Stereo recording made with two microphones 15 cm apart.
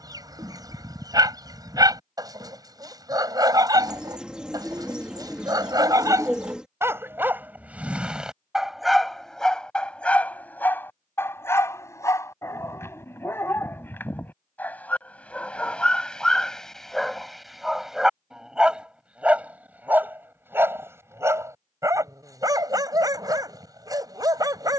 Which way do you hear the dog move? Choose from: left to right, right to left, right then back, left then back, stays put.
left then back.